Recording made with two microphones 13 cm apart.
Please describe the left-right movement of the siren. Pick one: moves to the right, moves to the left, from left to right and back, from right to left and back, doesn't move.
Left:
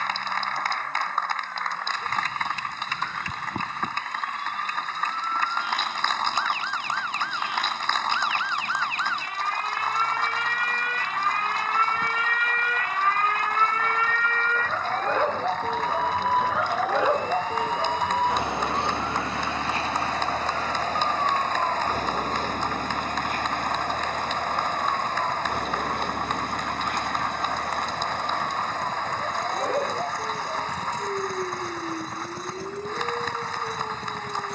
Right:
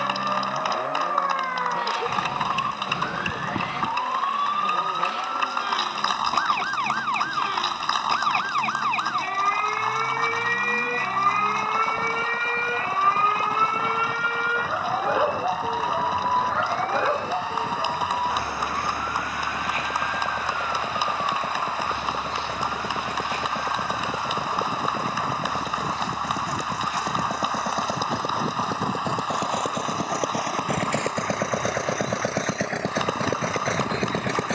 moves to the left.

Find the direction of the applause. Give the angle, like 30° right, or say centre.
10° right.